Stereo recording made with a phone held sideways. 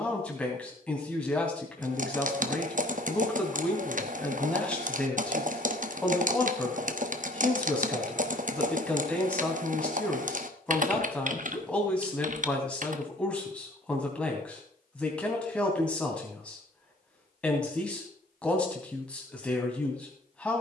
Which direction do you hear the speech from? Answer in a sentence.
You can hear the speech in the centre.